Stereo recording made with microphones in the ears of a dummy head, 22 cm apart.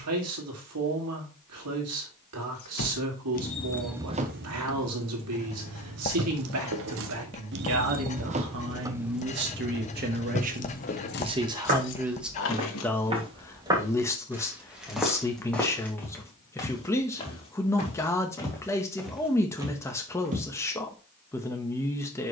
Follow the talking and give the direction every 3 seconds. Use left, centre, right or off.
right, right, right, right, centre, centre, centre, centre.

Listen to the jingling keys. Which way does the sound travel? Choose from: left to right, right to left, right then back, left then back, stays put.
right then back.